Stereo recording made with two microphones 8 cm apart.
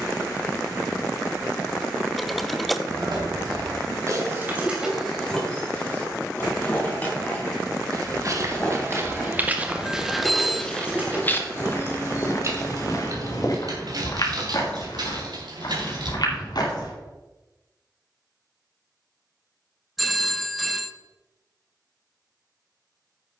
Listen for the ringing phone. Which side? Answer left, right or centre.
centre.